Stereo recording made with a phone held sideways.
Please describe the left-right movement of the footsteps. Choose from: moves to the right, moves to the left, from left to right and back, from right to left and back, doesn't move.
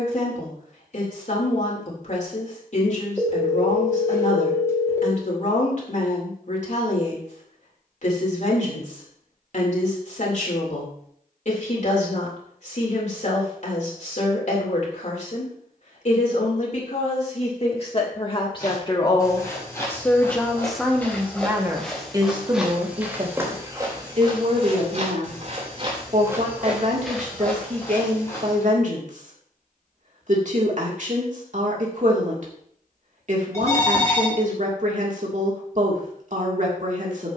from left to right and back.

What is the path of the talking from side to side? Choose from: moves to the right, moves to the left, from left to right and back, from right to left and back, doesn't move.
moves to the right.